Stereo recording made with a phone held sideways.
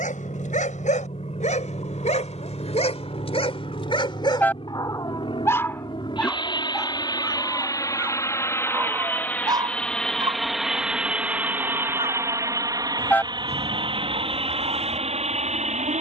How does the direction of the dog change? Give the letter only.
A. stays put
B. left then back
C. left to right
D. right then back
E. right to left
C.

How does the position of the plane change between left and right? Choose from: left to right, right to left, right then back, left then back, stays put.
left to right.